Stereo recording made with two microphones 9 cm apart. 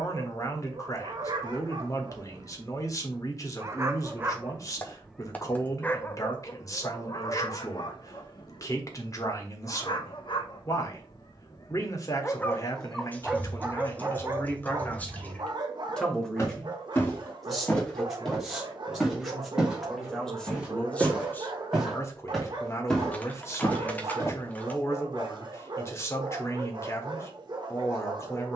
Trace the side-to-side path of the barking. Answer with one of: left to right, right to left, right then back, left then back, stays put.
left then back.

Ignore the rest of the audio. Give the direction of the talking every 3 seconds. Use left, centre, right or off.
left, left, left, left, left, centre, centre, left, left, left.